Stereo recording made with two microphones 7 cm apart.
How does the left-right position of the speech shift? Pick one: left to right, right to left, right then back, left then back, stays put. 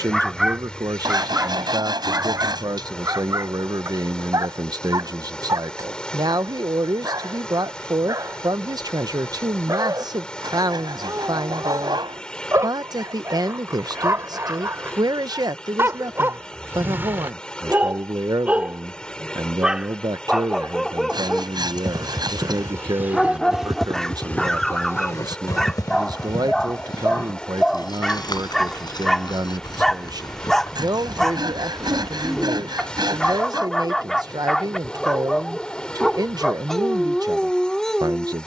stays put.